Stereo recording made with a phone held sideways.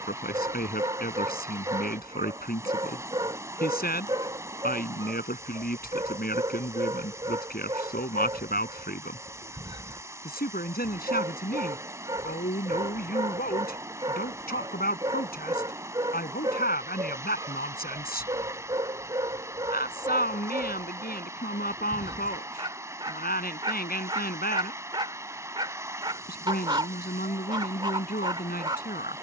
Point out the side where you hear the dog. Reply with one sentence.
In this clip you hear the dog on the right.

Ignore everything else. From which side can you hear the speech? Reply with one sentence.
You can hear the speech on the left.